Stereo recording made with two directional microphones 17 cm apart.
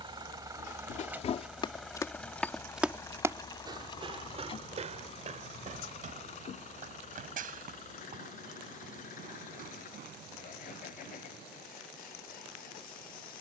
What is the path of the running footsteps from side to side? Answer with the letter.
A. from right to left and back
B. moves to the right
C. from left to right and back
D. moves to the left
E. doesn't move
B.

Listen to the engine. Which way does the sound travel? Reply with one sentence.
You can hear the engine travel towards the left.